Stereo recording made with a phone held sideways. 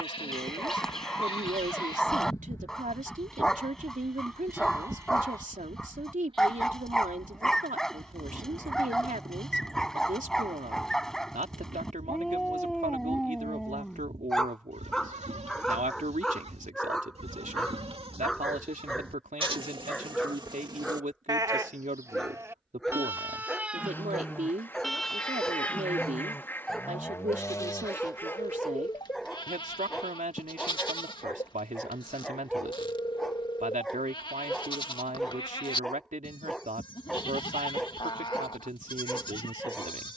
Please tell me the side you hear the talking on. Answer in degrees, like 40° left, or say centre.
60° right.